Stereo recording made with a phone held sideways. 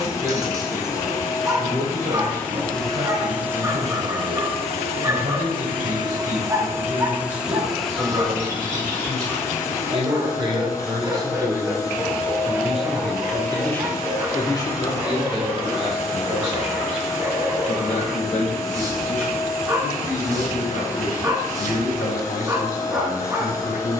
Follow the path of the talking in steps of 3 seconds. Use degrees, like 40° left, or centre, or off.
60° right, 60° right, 50° right, 30° right, 10° left, 40° left, 60° left, 70° left.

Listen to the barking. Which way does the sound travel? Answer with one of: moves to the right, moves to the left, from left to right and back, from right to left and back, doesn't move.
doesn't move.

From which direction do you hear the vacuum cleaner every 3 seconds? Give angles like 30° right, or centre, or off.
20° left, 30° right, 10° right, 20° left, 20° left, 20° left, 20° left, 20° left.